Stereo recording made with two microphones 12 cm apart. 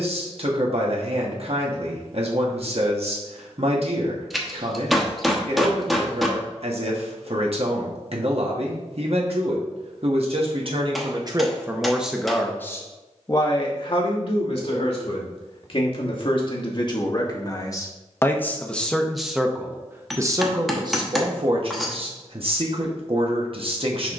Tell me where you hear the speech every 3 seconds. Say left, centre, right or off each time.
right, right, right, right, left, left, centre, right.